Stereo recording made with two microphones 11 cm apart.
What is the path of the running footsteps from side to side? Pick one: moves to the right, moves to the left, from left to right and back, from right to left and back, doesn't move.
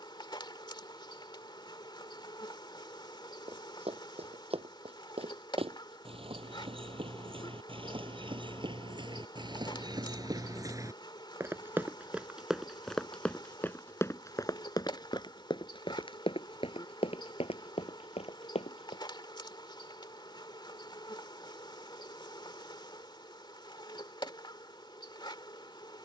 moves to the left.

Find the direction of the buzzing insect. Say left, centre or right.
left.